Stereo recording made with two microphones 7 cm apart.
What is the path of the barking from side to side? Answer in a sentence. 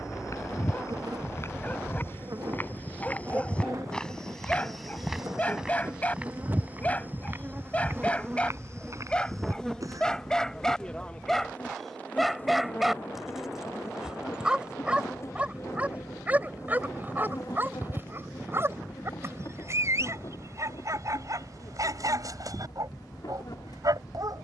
In this clip you hear the barking go from the left side to the right.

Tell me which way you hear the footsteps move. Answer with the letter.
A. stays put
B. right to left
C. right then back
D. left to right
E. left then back
D.